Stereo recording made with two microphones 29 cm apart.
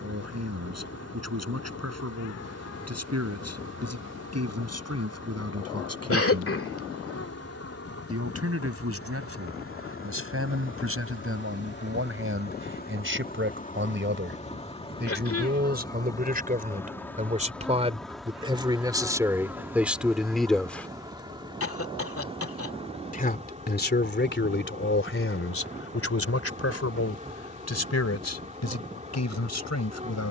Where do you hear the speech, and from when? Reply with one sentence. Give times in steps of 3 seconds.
You can hear the speech on the right from 0 s, in the centre from 18 s and on the left from 21 s.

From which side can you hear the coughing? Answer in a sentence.
In this clip you hear the coughing on the left.